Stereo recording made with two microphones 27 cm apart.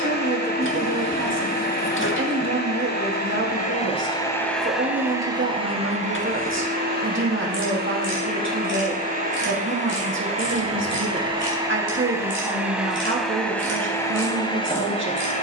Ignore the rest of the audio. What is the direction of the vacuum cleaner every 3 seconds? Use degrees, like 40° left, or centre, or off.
40° left, 10° left, 30° right, 20° right, centre.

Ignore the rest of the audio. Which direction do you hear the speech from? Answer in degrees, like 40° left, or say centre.
50° right.